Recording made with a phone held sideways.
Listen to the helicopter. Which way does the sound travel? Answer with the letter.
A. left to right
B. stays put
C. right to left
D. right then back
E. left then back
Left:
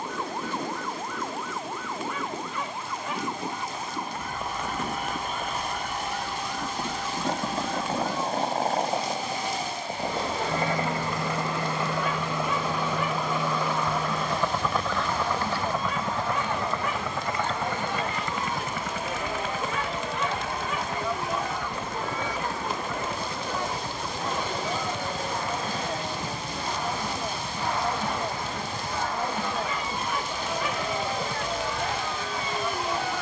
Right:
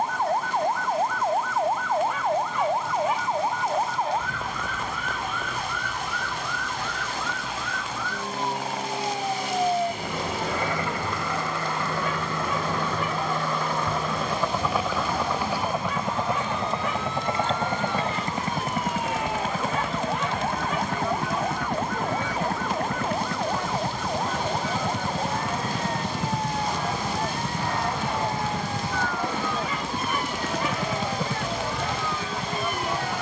A.